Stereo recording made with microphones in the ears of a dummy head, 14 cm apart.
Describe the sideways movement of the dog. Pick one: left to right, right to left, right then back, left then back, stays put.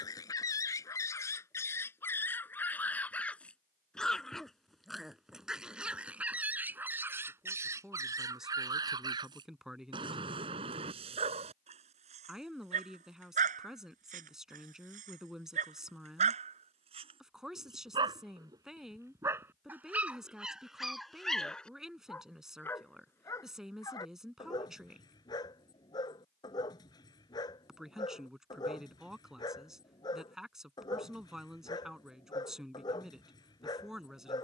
right then back.